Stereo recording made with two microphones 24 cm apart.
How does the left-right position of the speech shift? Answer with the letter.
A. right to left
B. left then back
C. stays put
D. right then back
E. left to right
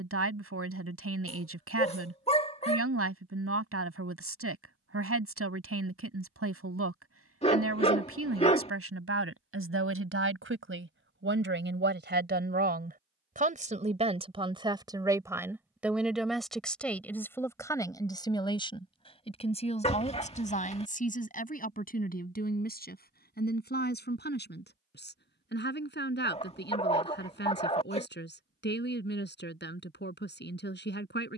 A.